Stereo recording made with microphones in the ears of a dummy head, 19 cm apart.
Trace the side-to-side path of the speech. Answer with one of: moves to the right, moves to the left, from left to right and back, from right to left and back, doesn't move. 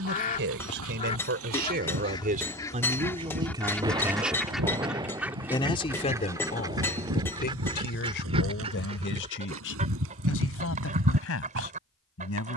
moves to the left.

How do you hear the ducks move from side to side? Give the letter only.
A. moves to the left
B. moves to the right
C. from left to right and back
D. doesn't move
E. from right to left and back
B.